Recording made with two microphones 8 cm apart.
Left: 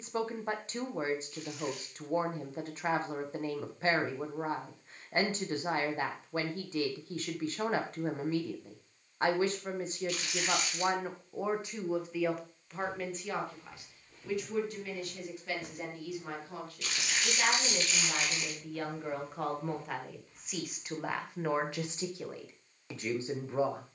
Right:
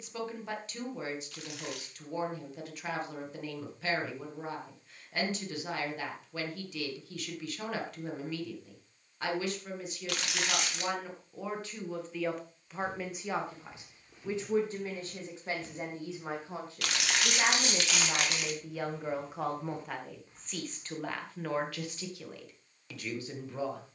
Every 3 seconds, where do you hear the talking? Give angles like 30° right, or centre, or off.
30° left, 30° left, 30° left, 30° left, 20° right, 30° right, 10° right, 20° left.